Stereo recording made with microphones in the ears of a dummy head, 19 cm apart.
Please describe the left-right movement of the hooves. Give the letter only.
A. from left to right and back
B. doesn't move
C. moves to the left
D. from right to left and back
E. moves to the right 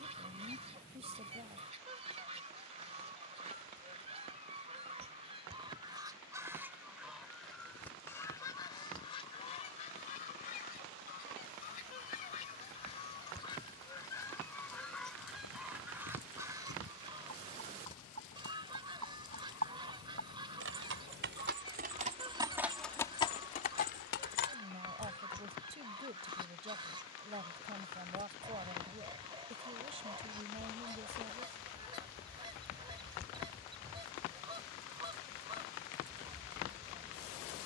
C.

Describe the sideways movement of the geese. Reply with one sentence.
In this clip you hear the geese move from right to left and back again.